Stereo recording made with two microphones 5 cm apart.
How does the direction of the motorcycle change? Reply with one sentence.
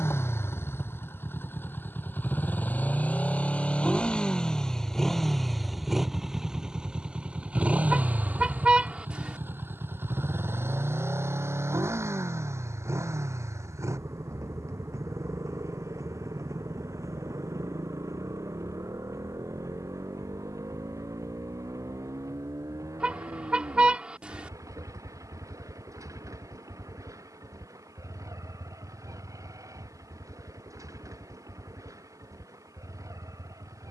You can hear the motorcycle travel towards the right.